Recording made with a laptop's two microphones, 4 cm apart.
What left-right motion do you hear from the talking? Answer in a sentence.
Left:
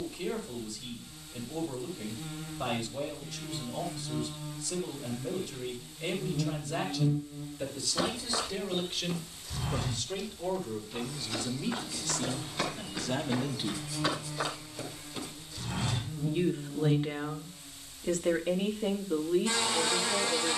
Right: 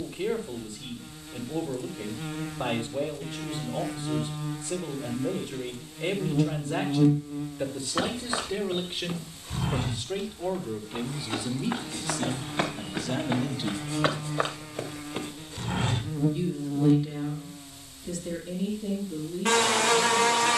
You can hear the talking move from right to left.